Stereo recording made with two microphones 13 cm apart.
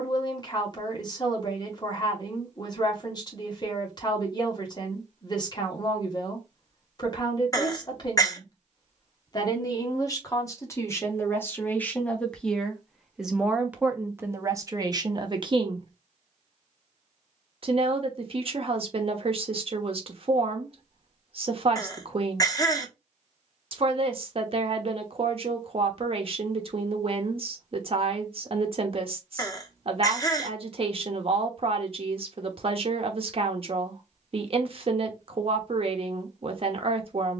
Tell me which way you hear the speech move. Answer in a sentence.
In this clip you hear the speech travel towards the right.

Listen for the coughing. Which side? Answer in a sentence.
In this clip you hear the coughing on the left.